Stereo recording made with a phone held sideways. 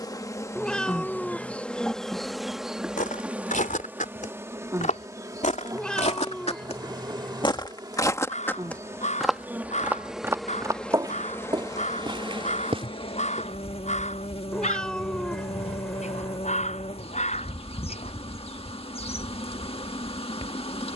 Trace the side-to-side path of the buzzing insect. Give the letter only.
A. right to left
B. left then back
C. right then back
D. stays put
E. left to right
C.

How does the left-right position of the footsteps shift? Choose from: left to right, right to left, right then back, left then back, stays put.
left to right.